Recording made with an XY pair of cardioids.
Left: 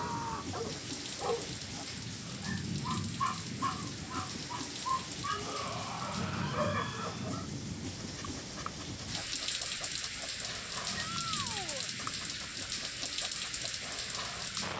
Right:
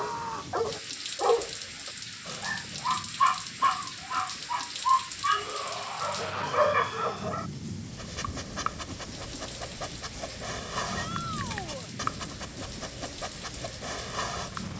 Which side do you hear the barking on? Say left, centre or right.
right.